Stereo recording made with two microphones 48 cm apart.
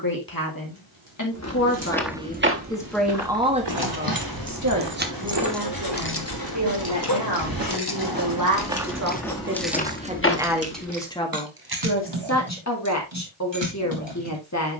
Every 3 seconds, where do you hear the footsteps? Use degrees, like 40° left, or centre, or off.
10° right, 60° right, 30° right, 20° left, off.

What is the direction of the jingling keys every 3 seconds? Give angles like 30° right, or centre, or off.
70° right, 30° right, 40° left, 20° right, 60° right.